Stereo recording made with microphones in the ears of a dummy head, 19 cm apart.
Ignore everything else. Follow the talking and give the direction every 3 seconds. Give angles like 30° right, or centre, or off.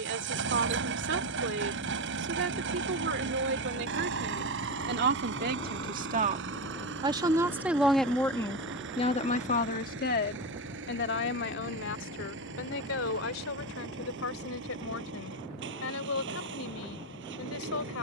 60° right, 50° right, 10° right, 50° left, 70° left, 70° left.